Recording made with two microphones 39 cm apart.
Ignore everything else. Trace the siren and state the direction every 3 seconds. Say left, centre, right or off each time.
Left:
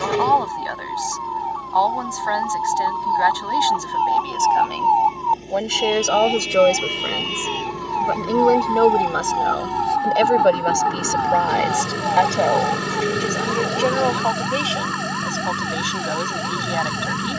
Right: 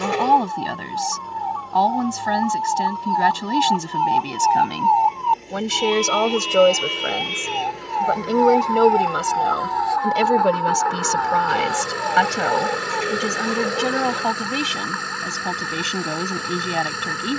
right, right, centre, left, left, left.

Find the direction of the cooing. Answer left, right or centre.
left.